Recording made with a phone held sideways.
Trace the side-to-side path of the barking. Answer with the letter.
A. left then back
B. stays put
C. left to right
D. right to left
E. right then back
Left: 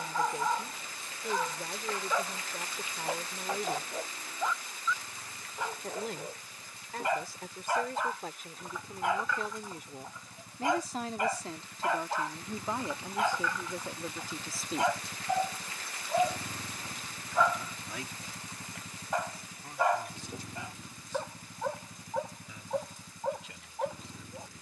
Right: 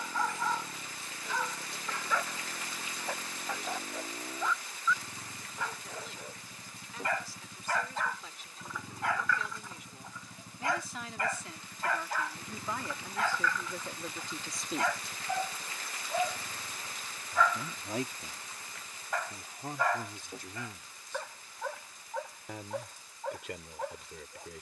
B.